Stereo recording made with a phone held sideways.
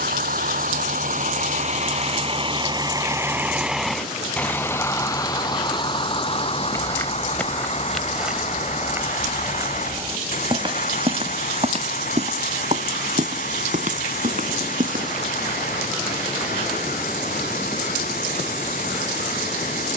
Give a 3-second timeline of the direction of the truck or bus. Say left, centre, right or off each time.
right, centre, left, left, left, left, left.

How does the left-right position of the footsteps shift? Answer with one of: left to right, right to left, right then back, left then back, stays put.
left to right.